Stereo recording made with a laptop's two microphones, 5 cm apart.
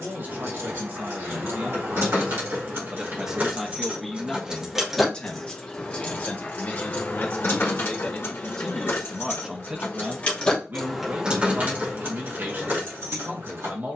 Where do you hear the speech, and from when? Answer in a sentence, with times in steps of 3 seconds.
In this clip you hear the speech on the right from 0 s, in the centre from 3 s, on the left from 6 s and on the right from 9 s.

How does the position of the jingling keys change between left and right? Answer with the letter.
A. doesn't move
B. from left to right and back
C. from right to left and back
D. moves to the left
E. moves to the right
C.